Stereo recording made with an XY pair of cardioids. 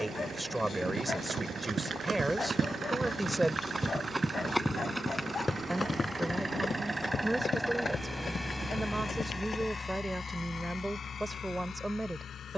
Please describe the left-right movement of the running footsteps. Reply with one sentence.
You can hear the running footsteps move to the left.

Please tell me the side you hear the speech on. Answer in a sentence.
In this clip you hear the speech in the centre.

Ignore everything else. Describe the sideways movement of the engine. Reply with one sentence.
In this clip you hear the engine go from the right side to the left.